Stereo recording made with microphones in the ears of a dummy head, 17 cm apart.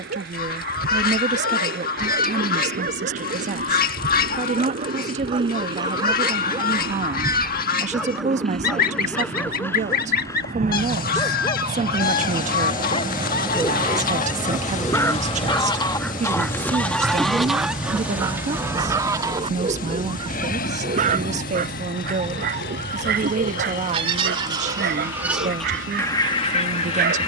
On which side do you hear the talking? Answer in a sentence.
In this clip you hear the talking on the right.